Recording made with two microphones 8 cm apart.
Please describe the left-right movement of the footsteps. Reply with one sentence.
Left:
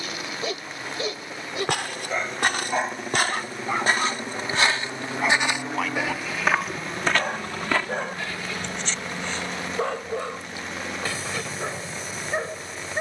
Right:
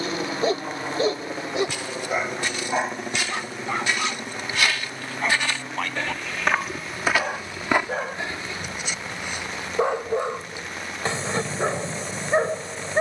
You can hear the footsteps go from the left side to the right.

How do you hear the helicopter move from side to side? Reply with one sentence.
In this clip you hear the helicopter move to the left.